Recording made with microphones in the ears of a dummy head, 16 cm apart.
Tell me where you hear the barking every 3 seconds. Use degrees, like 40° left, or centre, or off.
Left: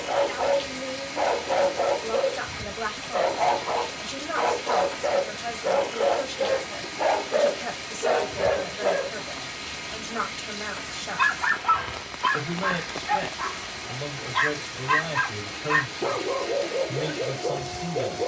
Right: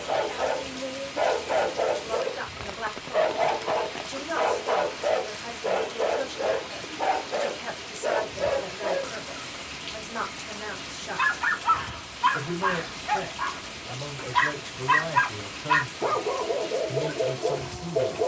10° right, 10° right, 10° left, centre, 10° right, 10° right.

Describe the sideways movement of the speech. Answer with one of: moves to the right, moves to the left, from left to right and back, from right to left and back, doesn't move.
doesn't move.